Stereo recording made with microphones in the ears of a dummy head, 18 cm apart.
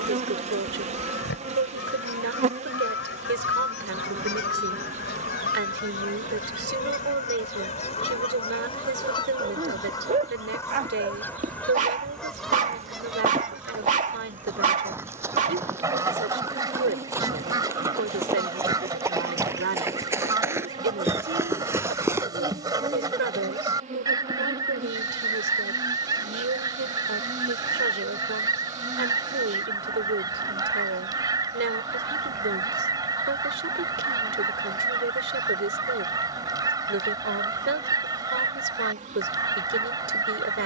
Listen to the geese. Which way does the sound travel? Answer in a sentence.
You can hear the geese travel towards the right.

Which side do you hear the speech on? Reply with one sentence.
You can hear the speech on the right.